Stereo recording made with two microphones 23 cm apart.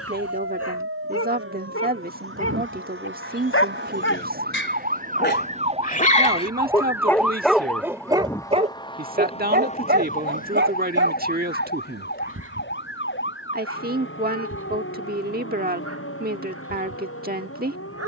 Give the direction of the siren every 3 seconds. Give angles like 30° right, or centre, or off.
60° right, 40° right, centre, 30° left, 50° left, 60° left.